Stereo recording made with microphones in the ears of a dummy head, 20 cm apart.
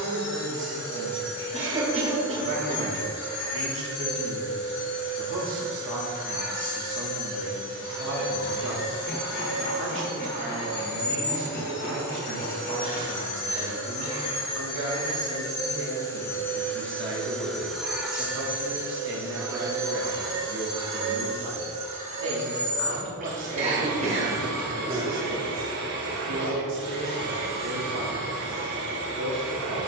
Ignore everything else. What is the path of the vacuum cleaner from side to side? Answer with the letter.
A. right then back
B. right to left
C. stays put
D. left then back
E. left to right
E.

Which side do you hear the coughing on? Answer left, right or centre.
right.